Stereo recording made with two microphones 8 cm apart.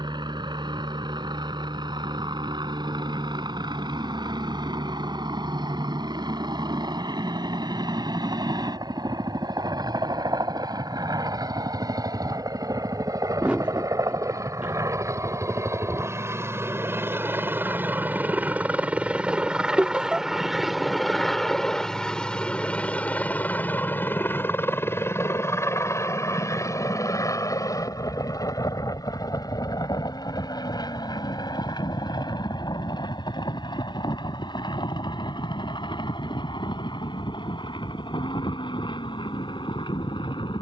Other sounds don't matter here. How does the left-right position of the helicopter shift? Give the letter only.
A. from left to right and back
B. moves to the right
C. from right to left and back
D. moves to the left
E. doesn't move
D.